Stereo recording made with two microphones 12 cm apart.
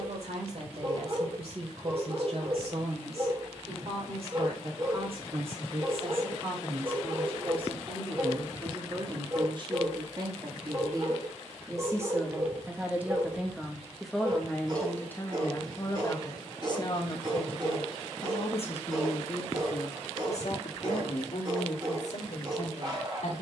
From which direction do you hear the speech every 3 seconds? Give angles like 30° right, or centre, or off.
60° right, 50° right, 50° right, 30° right, 10° right, 30° left, 60° left, 70° left.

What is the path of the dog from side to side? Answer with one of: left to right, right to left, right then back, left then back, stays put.
stays put.